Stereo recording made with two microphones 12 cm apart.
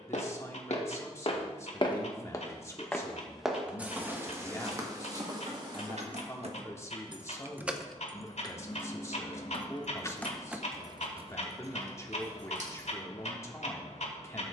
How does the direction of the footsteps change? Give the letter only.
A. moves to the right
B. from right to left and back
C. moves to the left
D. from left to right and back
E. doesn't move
A.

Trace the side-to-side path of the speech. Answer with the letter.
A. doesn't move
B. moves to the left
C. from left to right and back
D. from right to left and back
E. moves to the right
A.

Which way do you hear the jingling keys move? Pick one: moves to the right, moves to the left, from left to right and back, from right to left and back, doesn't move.
from right to left and back.